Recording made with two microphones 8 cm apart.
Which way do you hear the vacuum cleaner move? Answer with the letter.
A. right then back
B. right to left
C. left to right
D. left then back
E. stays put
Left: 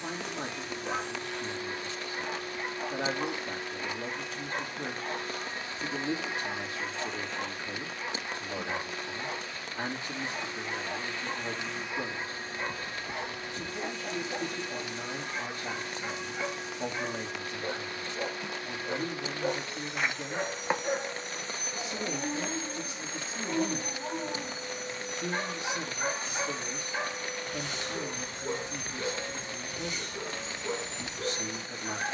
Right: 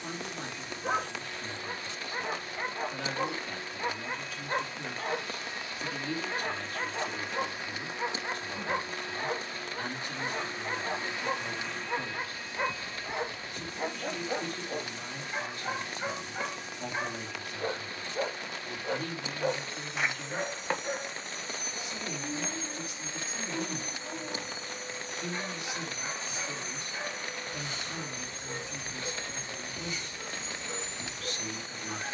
A.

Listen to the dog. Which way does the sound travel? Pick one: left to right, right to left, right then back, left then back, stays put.
right to left.